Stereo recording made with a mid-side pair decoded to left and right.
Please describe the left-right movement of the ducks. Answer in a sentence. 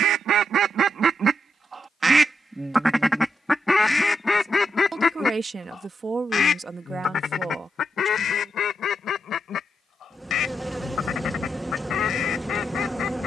In this clip you hear the ducks go from the right side to the left.